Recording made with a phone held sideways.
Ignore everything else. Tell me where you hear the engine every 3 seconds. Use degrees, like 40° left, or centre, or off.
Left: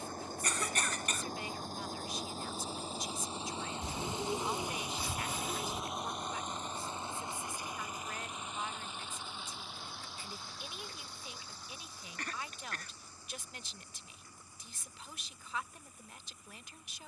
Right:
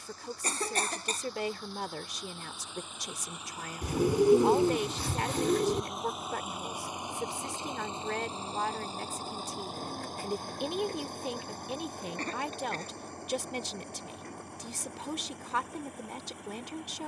40° left, 20° left, 20° right, 50° right, 60° right, 70° right.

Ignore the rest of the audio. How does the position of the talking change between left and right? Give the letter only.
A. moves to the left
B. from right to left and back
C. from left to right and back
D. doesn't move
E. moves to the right
D.